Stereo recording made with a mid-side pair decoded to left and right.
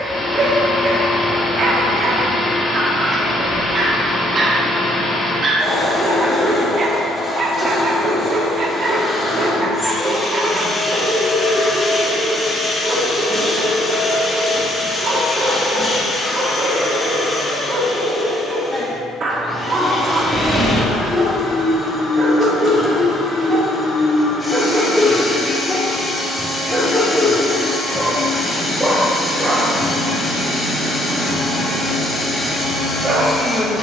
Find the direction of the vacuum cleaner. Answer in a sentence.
You can hear the vacuum cleaner on the left.